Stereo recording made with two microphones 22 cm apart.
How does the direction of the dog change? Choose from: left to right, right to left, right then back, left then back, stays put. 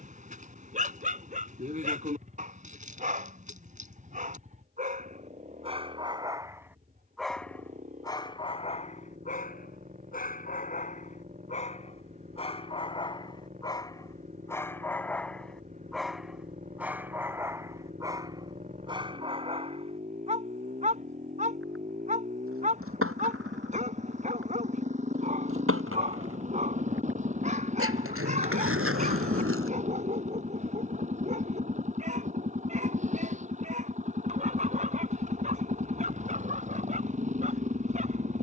left then back.